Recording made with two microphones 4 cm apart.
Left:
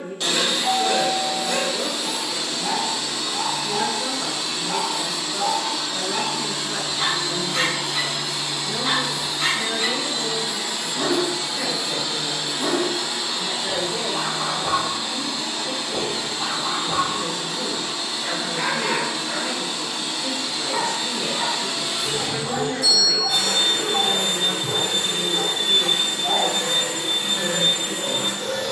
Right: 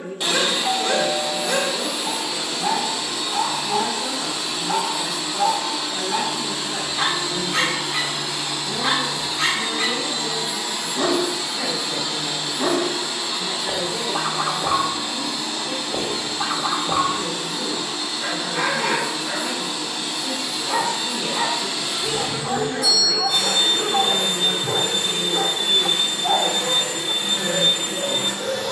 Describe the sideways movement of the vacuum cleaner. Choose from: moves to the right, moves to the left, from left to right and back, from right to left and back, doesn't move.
moves to the left.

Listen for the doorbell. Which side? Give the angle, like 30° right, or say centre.
40° left.